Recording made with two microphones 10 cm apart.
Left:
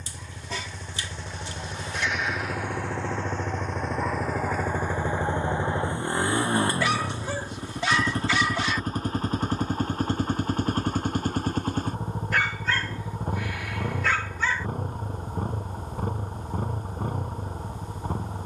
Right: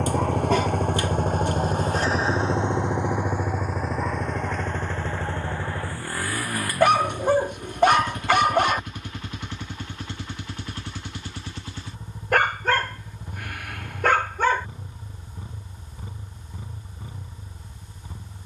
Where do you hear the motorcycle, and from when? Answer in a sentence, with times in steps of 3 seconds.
You can hear the motorcycle on the right from 0 s, in the centre from 3 s and on the left from 6 s.